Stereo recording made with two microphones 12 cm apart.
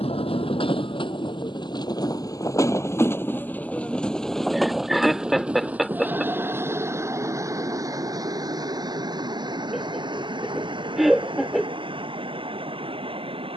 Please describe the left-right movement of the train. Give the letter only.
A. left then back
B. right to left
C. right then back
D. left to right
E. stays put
D.